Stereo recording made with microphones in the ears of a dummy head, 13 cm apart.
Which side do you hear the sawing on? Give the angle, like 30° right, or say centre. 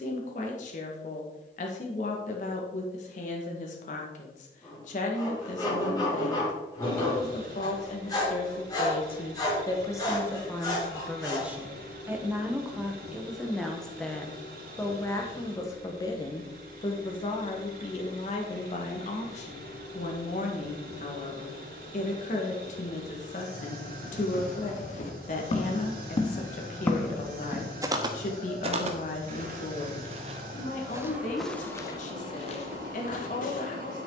30° left.